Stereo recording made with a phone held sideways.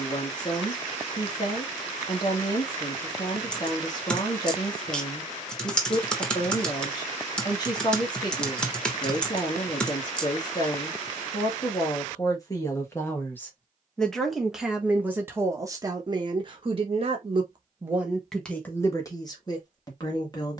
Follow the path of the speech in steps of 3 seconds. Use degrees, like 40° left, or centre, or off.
30° left, 30° left, 30° left, 30° left, 10° left, 30° right, 20° left.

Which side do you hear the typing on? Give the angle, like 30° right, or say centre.
10° left.